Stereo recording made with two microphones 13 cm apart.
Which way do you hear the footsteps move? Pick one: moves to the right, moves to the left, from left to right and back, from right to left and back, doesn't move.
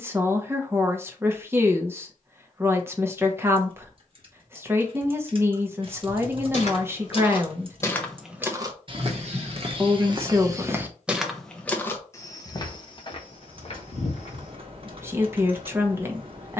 from left to right and back.